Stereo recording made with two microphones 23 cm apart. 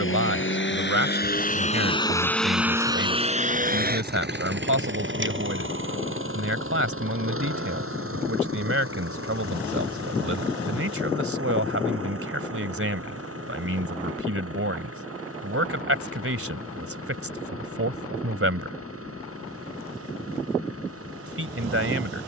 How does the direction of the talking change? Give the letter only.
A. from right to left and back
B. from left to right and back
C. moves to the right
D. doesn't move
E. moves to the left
D.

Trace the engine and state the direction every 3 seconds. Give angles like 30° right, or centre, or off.
30° left, 50° right, 70° right, 80° right, 80° right, 80° right, 80° right, 80° right.